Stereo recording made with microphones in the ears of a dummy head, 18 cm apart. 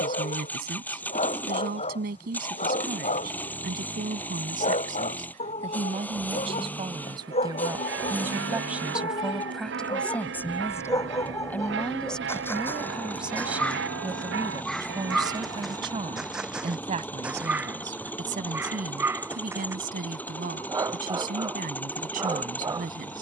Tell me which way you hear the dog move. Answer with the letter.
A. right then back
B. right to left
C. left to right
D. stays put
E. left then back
C.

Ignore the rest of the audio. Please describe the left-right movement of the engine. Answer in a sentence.
You can hear the engine stay put.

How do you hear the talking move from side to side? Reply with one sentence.
In this clip you hear the talking go left and come back.